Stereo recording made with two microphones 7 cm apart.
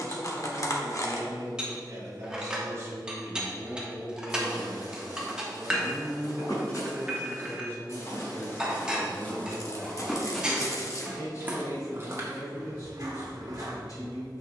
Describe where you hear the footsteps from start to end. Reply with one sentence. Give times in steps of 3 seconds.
In this clip you hear the footsteps not at all from 0 s, on the left from 3 s, in the centre from 9 s and on the right from 12 s.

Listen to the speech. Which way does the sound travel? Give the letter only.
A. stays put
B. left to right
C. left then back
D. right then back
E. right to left
E.